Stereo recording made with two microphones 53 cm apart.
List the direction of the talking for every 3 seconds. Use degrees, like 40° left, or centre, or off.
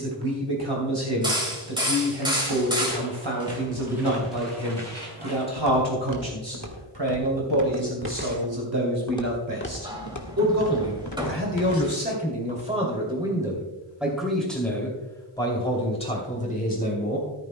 60° right, 60° right, 50° right, 30° right, 10° right, 10° left.